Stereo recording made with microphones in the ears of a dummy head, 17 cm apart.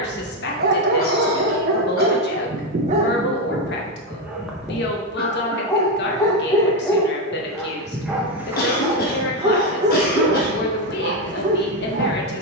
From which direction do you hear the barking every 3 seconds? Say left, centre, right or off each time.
right, centre, centre, right.